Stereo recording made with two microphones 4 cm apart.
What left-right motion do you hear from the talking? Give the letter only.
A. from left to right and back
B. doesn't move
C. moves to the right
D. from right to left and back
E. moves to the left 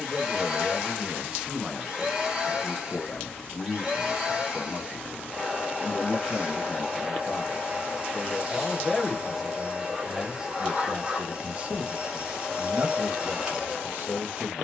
D.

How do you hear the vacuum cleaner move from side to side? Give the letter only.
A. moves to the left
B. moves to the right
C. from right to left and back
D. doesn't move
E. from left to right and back
D.